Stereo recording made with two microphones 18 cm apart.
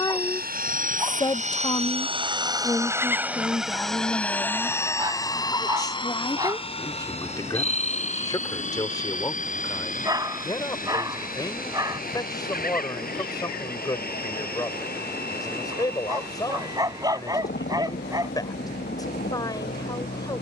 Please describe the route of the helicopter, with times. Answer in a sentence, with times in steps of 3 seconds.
In this clip you hear the helicopter on the right from 0 s, in the centre from 3 s and on the left from 6 s.